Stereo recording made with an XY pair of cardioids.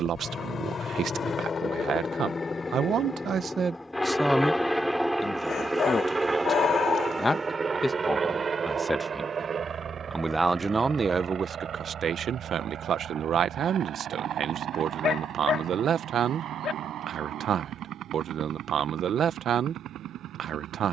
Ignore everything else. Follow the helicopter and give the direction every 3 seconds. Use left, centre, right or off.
left, centre, right, right, right, right, right.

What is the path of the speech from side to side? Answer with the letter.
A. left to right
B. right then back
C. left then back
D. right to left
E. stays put
C.